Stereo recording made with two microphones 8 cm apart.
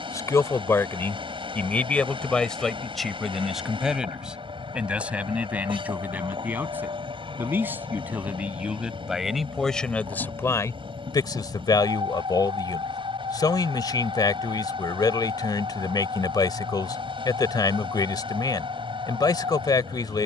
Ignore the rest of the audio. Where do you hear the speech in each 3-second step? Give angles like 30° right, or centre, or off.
20° left, 10° right, 20° right, 30° left, 50° left, 50° left, 50° left.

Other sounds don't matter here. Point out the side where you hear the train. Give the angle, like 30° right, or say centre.
80° right.